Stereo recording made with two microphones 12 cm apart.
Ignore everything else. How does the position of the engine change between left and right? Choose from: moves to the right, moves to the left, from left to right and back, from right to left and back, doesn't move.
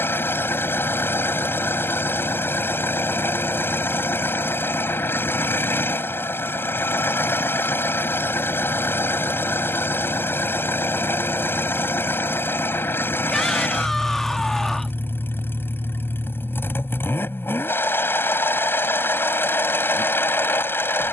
doesn't move.